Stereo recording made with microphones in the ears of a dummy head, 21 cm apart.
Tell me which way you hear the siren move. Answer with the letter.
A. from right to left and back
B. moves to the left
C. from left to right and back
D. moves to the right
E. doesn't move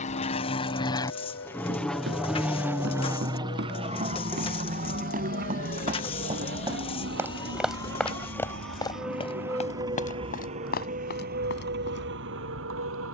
D.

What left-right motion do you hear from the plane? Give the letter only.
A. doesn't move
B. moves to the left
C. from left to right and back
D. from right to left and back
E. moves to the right
E.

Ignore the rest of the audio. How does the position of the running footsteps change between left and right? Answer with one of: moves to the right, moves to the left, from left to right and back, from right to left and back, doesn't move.
moves to the left.